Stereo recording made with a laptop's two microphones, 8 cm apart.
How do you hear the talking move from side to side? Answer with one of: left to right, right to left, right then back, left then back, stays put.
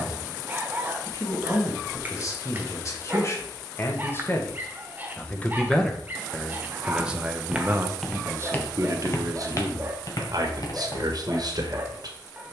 left to right.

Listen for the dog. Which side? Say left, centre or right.
right.